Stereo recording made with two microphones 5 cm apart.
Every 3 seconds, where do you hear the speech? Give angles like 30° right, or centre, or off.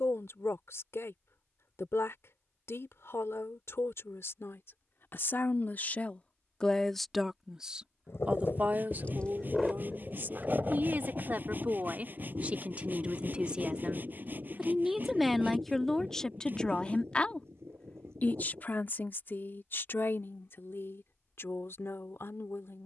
60° left, 50° left, 10° right, 40° right, 20° right, 10° left, 50° left, 60° left.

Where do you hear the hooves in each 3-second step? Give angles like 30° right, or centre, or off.
off, off, 50° left, 20° right, 50° right, 60° right, 60° right, off.